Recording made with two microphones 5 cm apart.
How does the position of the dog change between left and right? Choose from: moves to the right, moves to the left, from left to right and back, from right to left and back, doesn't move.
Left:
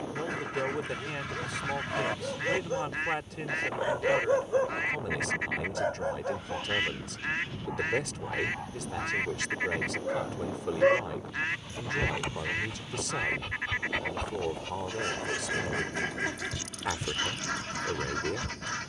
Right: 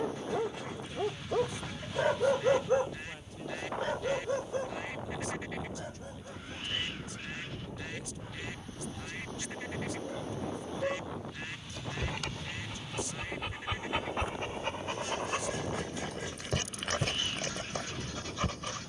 from right to left and back.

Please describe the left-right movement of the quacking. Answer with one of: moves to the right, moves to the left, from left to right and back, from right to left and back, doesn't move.
doesn't move.